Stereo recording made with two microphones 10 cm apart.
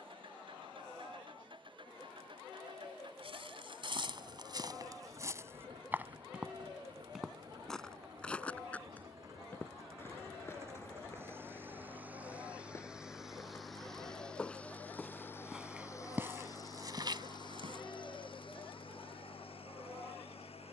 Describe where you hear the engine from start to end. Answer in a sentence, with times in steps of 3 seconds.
In this clip you hear the engine on the right from 0 s, in the centre from 12 s and on the left from 15 s.